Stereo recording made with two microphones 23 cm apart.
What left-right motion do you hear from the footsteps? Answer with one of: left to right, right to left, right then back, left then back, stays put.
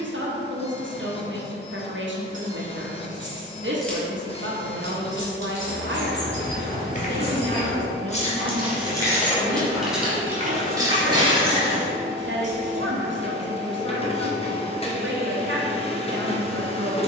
left to right.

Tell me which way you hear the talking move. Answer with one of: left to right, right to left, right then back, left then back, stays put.
stays put.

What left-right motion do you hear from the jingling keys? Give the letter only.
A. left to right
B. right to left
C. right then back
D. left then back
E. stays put
D.